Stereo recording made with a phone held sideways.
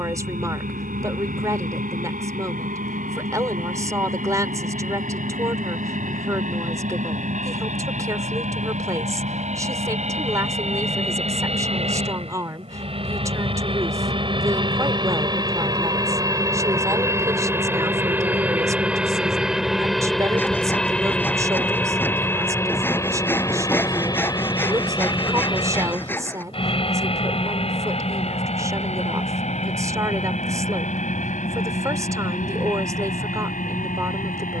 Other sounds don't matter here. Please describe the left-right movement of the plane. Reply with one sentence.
In this clip you hear the plane go from the right side to the left.